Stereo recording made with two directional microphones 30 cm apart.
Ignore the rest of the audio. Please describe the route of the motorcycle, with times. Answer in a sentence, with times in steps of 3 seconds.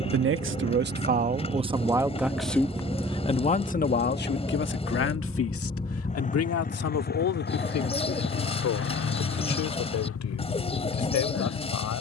In this clip you hear the motorcycle on the right from 0 s, in the centre from 3 s and on the left from 6 s.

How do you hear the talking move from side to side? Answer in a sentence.
You can hear the talking move to the left.